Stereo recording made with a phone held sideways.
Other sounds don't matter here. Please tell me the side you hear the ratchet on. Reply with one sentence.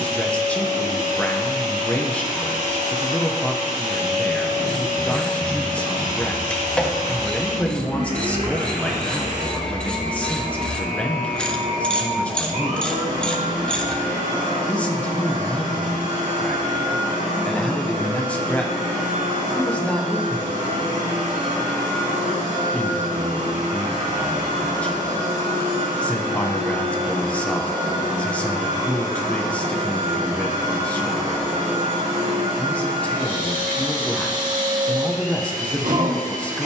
You can hear the ratchet in the centre.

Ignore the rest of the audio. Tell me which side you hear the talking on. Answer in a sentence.
In this clip you hear the talking in the centre.